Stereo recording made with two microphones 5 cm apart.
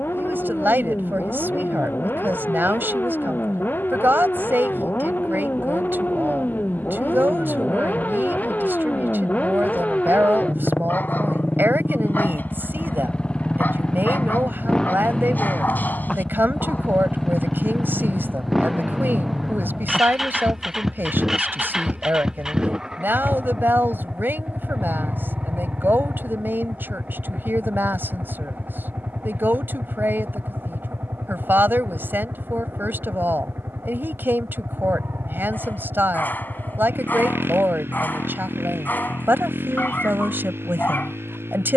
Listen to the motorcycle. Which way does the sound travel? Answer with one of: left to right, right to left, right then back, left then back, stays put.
left to right.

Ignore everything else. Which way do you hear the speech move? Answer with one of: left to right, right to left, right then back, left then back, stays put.
stays put.